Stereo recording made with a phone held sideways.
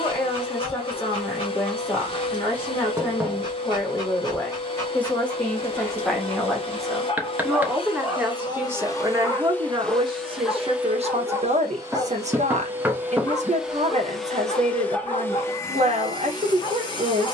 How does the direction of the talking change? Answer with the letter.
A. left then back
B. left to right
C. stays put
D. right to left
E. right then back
B.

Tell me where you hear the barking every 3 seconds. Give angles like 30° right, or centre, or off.
40° left, 20° left, centre, 10° left, 30° left, 40° left.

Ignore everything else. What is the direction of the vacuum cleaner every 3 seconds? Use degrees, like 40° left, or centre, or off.
40° left, 40° left, 40° left, centre, 10° right, 30° left.